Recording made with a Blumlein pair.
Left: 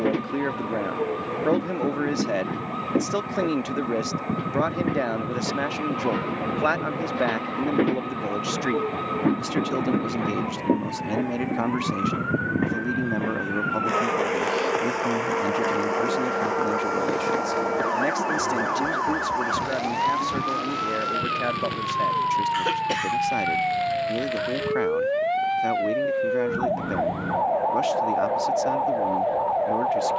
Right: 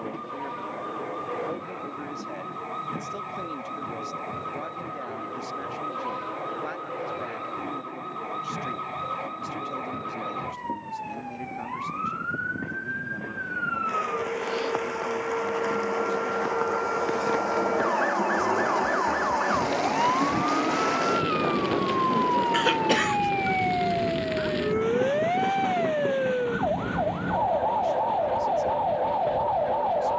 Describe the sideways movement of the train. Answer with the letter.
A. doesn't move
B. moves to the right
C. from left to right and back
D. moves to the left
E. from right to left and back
B.